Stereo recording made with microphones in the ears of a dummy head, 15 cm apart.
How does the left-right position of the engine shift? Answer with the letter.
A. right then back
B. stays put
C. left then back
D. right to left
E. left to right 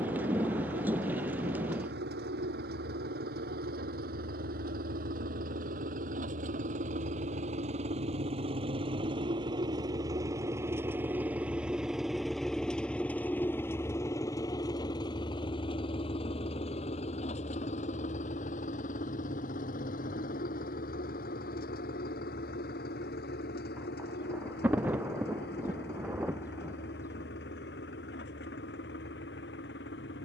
D.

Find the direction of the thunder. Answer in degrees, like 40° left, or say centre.
10° right.